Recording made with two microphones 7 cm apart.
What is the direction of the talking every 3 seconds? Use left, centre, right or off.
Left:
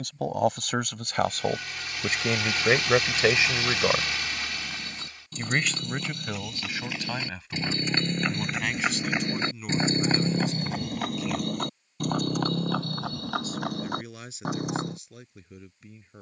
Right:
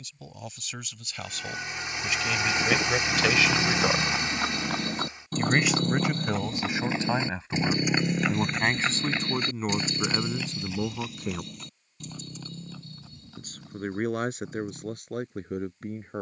left, centre, right, right, right, right.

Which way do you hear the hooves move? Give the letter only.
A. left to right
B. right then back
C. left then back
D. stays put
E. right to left
E.